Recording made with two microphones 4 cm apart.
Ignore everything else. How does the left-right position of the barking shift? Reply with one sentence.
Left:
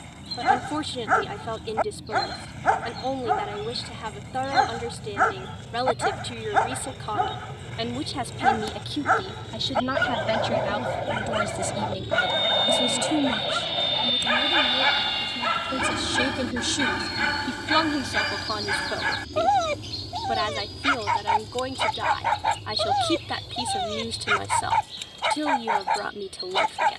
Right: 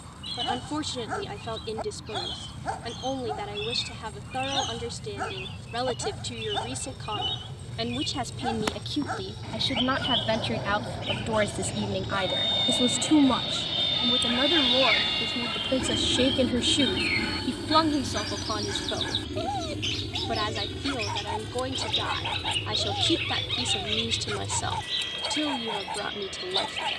In this clip you hear the barking stay in one place.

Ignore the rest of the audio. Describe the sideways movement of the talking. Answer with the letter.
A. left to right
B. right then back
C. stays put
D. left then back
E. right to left
B.